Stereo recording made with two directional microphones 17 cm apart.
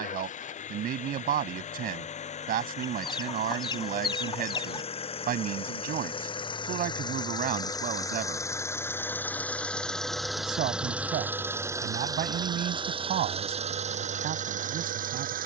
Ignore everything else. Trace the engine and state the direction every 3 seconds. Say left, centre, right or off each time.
left, left, left, centre, right.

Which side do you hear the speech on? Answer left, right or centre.
right.